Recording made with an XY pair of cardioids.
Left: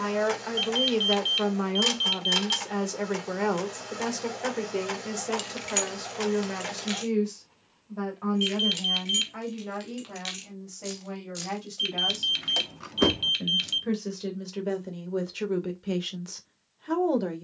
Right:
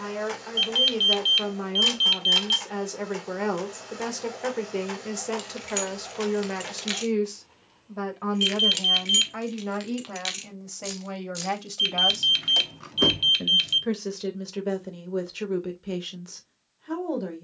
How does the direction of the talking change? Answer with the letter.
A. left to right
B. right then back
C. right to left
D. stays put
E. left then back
B.